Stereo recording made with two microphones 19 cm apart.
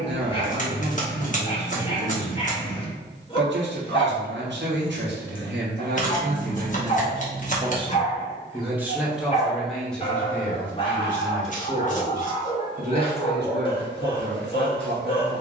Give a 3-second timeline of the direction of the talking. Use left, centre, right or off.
right, right, right, centre, right.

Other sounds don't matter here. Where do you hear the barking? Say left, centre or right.
left.